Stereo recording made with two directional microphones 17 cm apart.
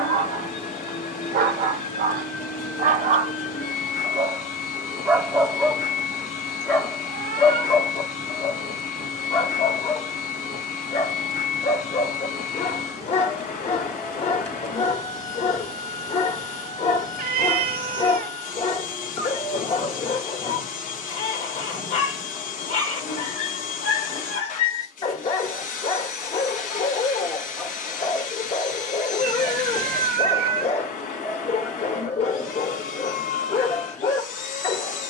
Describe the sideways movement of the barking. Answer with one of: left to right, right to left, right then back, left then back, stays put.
right to left.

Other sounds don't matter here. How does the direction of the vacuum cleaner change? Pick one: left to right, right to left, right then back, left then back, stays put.
stays put.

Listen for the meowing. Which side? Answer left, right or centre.
right.